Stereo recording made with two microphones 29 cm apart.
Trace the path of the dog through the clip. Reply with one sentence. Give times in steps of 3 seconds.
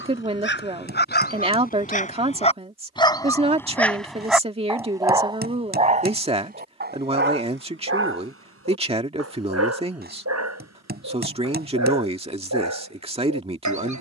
In this clip you hear the dog on the left from 0 s, in the centre from 3 s and on the right from 6 s.